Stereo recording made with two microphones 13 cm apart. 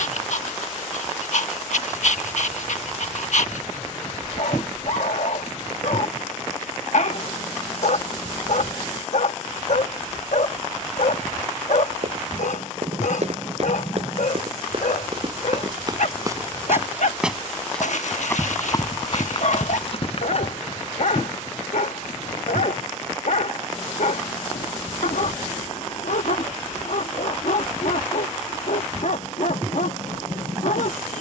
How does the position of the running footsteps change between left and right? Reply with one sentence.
You can hear the running footsteps move from right to left.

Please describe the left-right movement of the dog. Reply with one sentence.
In this clip you hear the dog stay put.